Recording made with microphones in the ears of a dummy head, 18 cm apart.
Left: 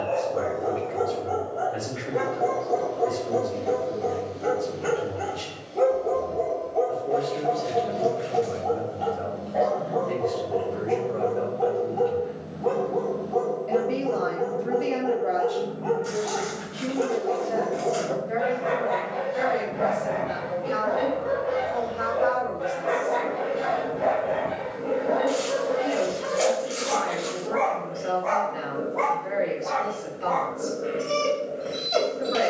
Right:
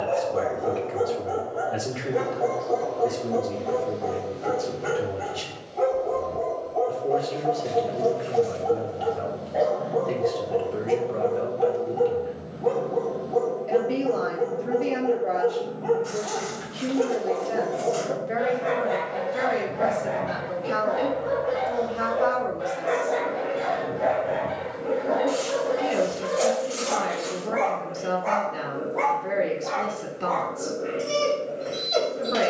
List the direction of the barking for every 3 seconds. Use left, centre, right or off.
centre, left, centre, centre, centre, centre, centre, centre, centre, centre, centre.